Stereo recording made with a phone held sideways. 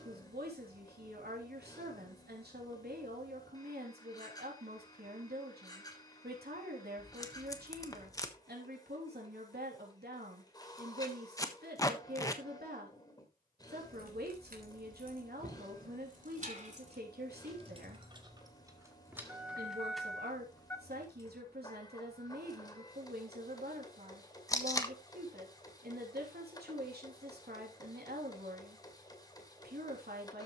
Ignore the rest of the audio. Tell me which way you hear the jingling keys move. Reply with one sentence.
In this clip you hear the jingling keys move to the left.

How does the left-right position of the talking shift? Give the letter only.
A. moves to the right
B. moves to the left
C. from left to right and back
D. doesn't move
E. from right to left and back
D.